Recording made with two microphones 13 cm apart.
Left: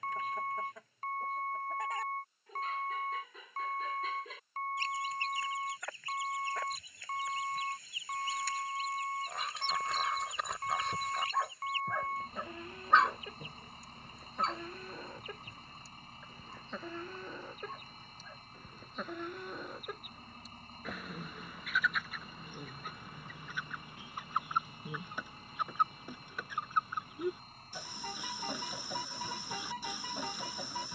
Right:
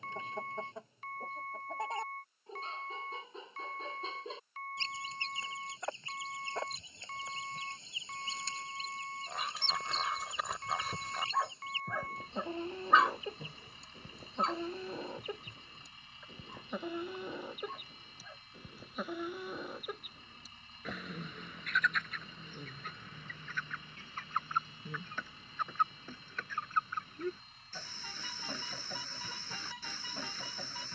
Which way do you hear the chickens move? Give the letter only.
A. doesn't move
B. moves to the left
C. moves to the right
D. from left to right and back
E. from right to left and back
B.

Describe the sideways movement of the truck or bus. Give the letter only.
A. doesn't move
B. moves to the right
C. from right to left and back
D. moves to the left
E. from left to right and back
A.